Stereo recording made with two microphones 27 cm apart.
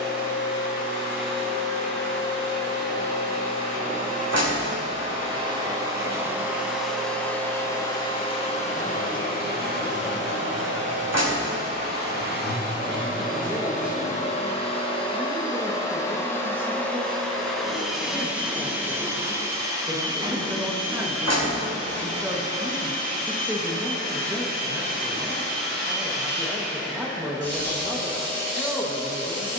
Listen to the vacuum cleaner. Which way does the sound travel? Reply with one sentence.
In this clip you hear the vacuum cleaner go left and come back.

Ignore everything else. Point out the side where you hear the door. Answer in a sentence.
In this clip you hear the door on the right.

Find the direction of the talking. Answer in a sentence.
You can hear the talking in the centre.